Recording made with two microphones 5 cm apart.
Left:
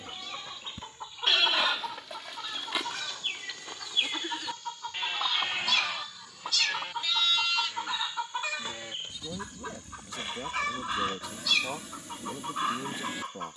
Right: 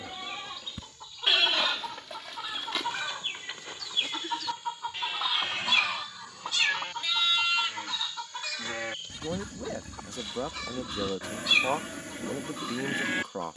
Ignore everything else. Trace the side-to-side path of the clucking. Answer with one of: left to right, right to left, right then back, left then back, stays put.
right then back.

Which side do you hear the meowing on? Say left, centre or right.
right.